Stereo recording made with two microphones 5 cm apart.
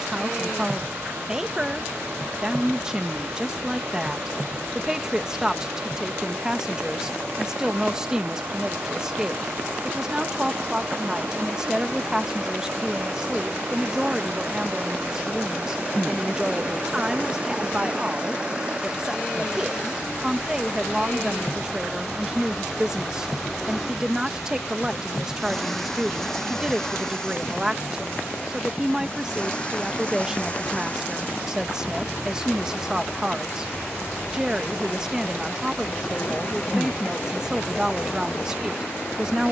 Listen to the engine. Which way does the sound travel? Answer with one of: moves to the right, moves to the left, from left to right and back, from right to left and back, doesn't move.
moves to the left.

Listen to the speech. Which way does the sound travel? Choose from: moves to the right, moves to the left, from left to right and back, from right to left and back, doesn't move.
doesn't move.